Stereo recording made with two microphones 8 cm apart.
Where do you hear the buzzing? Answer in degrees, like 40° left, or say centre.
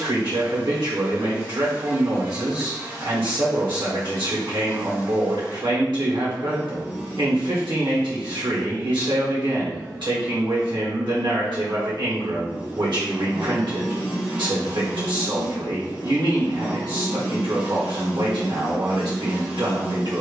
20° right.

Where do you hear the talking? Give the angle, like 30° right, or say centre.
80° right.